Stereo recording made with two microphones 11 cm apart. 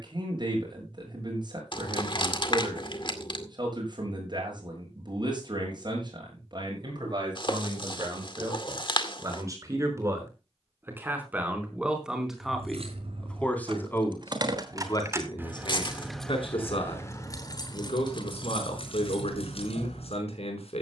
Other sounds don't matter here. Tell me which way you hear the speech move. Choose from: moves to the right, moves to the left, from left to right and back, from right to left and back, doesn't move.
moves to the left.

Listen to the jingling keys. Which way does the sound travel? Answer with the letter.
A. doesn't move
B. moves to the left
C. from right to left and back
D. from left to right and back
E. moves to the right
B.